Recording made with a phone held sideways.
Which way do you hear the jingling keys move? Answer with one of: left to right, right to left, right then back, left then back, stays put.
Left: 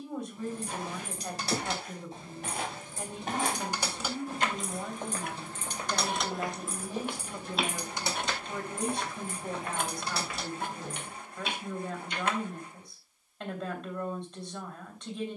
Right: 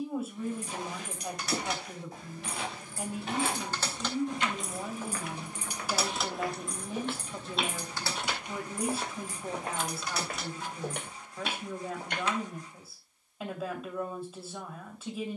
right then back.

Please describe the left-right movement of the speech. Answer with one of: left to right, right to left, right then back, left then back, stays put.
stays put.